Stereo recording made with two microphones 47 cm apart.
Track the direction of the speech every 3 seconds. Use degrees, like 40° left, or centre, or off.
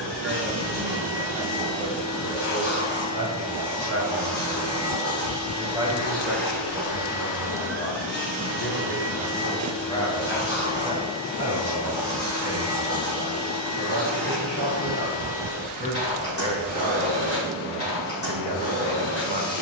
60° right, 30° right, 10° left, centre, 50° right, 50° right, 50° right.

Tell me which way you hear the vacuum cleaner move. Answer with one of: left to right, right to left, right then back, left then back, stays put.
stays put.